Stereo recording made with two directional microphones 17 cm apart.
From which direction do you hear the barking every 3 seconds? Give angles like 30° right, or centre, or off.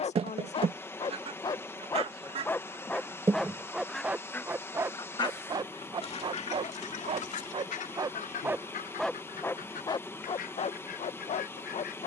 20° left, 10° right, 30° right, 30° left.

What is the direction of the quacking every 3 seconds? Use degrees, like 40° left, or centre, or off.
40° right, 10° left, 50° left, 60° left.